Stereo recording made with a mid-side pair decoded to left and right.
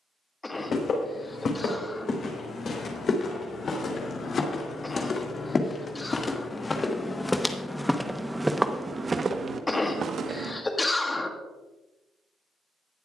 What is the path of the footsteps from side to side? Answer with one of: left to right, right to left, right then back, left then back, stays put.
left to right.